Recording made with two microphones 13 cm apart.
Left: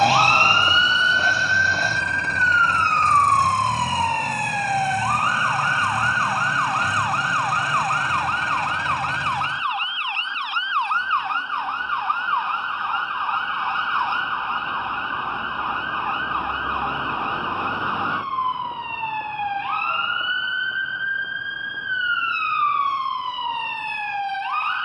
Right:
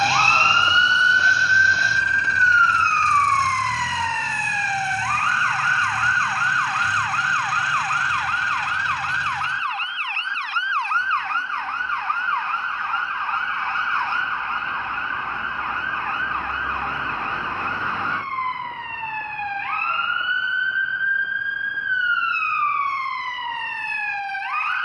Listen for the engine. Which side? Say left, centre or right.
left.